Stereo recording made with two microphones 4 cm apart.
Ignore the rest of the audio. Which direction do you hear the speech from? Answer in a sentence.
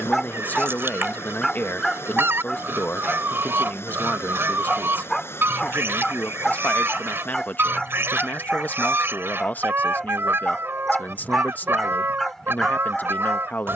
In this clip you hear the speech on the left.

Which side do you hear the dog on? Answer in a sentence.
In this clip you hear the dog in the centre.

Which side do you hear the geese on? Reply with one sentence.
You can hear the geese on the right.